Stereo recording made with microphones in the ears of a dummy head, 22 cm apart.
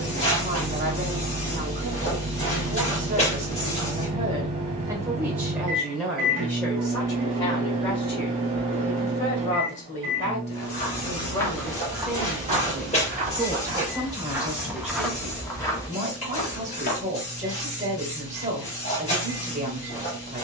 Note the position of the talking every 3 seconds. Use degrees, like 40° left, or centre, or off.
30° right, 20° right, 20° left, 30° left, 10° right, 30° right, 30° right.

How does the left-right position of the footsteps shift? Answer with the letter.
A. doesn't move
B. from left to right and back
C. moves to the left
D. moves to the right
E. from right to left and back
B.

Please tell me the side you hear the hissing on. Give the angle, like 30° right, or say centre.
30° left.